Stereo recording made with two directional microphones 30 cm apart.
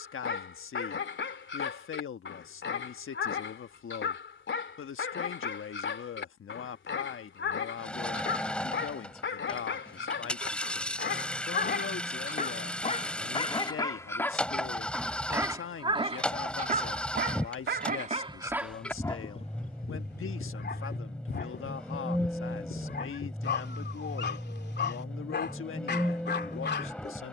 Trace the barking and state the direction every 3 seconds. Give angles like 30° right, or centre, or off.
40° left, 40° left, 40° left, 40° left, 20° left, 20° right, 20° left, 30° left, 30° left.